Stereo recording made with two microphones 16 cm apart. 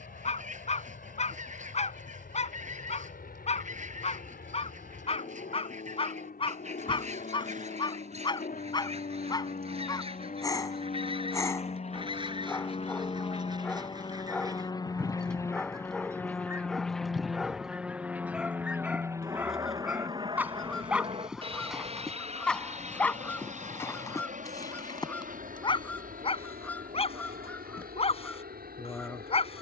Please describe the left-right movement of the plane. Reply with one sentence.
In this clip you hear the plane travel towards the right.